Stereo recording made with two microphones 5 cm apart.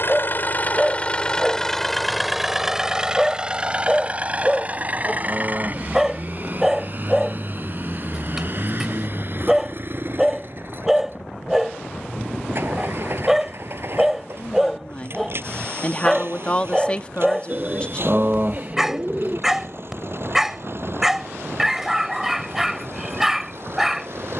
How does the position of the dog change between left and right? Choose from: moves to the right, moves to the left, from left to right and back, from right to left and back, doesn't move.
doesn't move.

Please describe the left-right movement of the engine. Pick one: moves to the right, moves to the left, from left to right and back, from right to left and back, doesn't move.
moves to the right.